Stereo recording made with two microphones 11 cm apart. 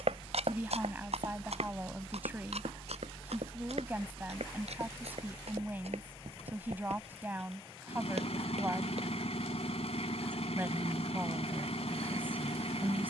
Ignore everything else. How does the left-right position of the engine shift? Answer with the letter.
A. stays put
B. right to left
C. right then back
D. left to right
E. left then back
A.